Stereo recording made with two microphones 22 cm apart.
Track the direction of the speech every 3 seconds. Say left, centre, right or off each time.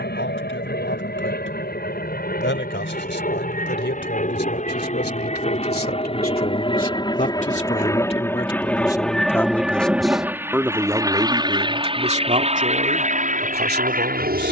left, left, left, centre, right.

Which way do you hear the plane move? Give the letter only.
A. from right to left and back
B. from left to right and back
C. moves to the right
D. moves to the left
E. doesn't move
C.